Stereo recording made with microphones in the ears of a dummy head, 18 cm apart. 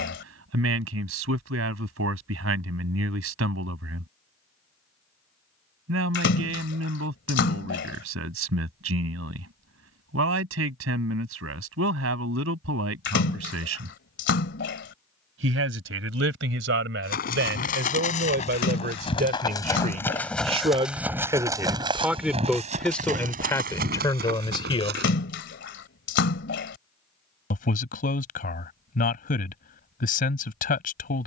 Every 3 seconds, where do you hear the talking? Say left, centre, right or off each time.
right, right, right, right, right, right, right, centre, left, left, left.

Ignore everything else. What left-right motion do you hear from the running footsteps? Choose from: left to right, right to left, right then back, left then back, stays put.
left to right.